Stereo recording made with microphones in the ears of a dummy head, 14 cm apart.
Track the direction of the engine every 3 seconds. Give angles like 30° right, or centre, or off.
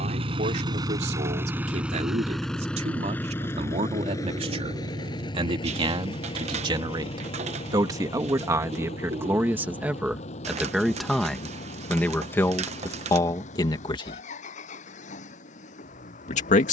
10° right, 20° left, 40° left, 50° left, 50° left, 50° left.